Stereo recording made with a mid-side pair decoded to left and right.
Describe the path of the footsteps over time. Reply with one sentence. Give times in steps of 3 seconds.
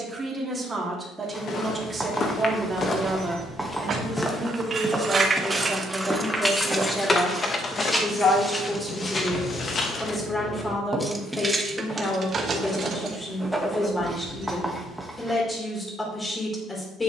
You can hear the footsteps on the left from 0 s, in the centre from 3 s, on the left from 9 s and not at all from 12 s.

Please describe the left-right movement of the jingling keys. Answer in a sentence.
In this clip you hear the jingling keys move from right to left and back again.